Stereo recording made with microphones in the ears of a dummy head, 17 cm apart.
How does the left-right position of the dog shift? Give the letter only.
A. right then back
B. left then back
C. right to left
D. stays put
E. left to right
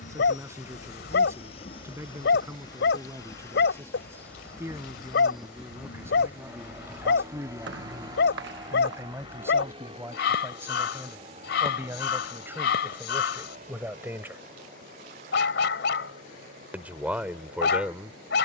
D.